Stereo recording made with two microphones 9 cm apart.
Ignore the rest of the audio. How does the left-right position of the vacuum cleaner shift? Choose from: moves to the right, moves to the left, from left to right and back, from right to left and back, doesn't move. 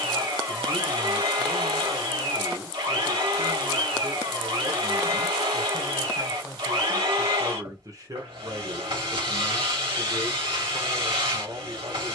doesn't move.